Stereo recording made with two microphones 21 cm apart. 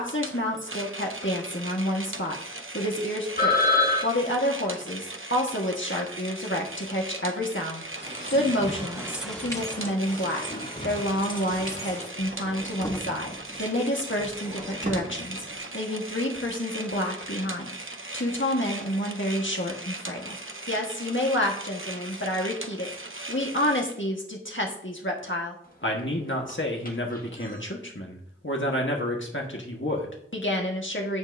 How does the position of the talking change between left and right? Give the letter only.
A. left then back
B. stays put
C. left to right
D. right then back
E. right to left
B.